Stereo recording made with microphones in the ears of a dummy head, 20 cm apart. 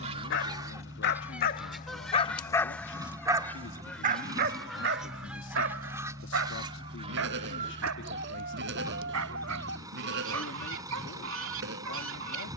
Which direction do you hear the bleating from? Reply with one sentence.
You can hear the bleating on the right.